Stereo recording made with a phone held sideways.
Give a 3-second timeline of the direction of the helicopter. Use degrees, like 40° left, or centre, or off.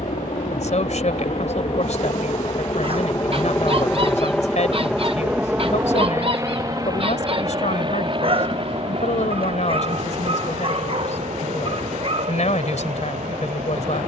50° left, 10° left, 30° right, 50° right, 50° right.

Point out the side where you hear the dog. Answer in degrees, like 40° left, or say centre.
40° right.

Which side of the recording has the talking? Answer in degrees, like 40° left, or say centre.
60° left.